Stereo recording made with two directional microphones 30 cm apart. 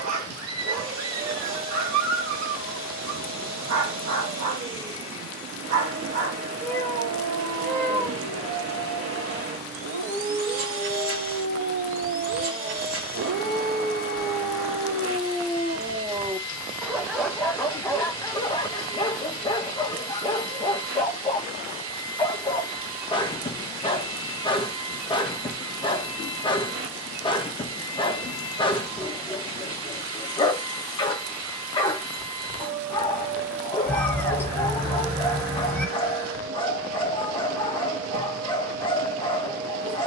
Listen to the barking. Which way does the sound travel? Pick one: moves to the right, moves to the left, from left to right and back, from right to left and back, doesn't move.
moves to the left.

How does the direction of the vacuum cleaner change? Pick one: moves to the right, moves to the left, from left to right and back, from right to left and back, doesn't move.
doesn't move.